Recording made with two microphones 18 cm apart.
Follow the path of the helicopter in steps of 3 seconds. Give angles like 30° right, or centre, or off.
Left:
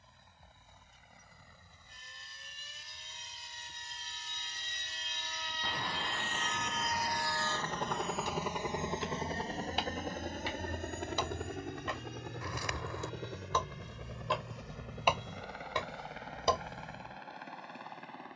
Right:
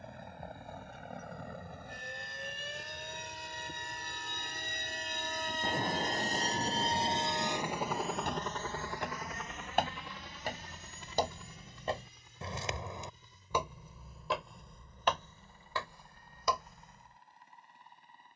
70° right, 60° right, 10° right, 50° left, 70° left, 80° left.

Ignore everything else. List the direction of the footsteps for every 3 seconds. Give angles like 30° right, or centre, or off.
off, off, 60° right, 40° right, 10° right, 20° left.